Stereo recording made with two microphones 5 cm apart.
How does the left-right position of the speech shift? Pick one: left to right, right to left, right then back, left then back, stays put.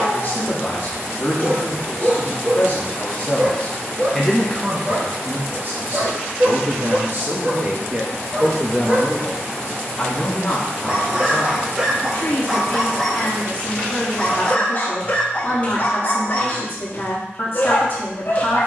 right then back.